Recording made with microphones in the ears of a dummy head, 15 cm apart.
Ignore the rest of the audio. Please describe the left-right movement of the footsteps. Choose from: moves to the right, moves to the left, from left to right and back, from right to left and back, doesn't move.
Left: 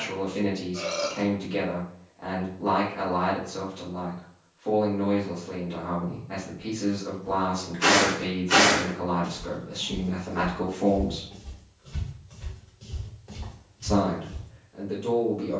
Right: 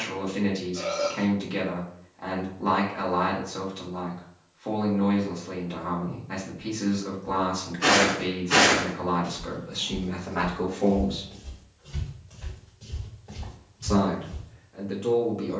from left to right and back.